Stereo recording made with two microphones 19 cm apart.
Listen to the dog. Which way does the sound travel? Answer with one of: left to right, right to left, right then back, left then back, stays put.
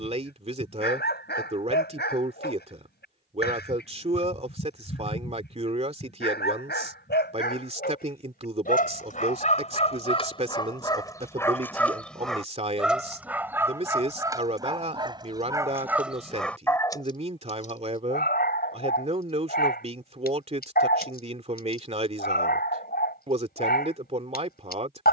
right then back.